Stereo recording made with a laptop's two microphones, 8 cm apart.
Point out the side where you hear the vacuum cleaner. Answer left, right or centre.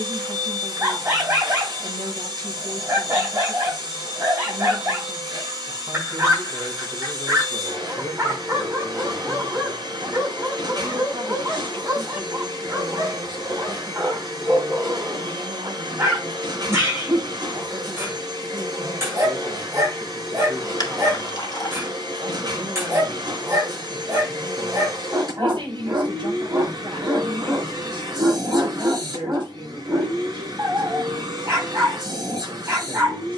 right.